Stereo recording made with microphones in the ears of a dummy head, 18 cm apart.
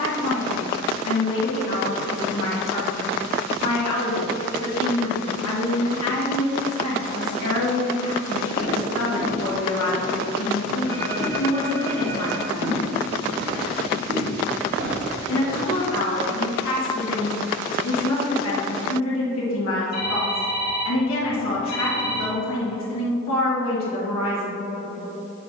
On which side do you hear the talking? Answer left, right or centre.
left.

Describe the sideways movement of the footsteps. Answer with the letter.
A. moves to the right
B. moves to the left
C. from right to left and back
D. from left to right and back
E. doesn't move
A.